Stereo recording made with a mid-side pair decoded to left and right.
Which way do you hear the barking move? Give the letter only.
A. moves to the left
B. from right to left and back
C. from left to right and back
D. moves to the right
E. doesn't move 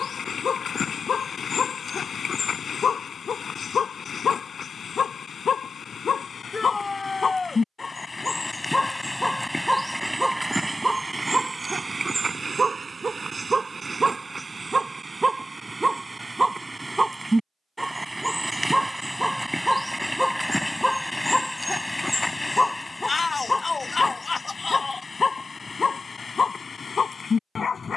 C.